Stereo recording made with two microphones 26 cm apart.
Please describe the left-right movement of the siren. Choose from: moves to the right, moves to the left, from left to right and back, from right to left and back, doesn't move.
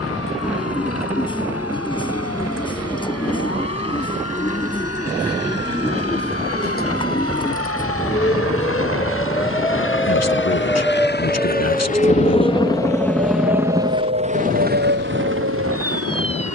moves to the right.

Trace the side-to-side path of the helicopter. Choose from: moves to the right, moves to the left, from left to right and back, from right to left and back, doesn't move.
moves to the right.